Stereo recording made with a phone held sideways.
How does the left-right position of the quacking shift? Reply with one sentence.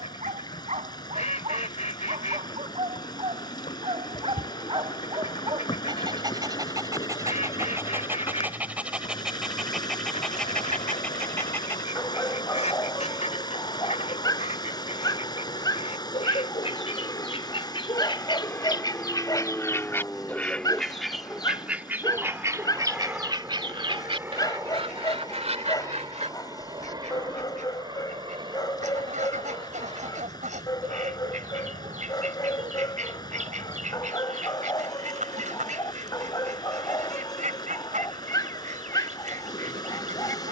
You can hear the quacking move to the right.